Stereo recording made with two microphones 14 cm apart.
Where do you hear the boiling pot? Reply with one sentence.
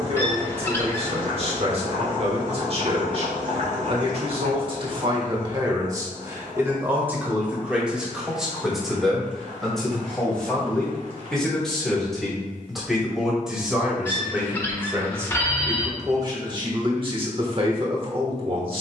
You can hear the boiling pot on the right.